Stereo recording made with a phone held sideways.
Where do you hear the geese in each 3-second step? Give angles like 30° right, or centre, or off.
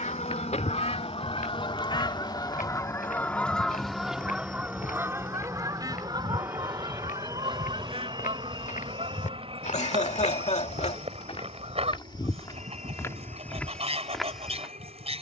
40° left, 10° right, 40° right, 50° right, 50° right.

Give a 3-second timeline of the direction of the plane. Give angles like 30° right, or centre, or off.
40° left, 10° left, 20° right, 40° right, 50° right.